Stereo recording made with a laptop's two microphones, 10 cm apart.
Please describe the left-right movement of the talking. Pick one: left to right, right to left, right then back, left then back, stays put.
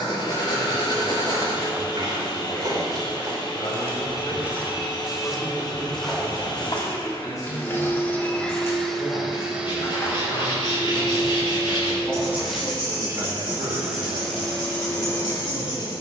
left then back.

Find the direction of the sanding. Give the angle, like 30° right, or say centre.
50° left.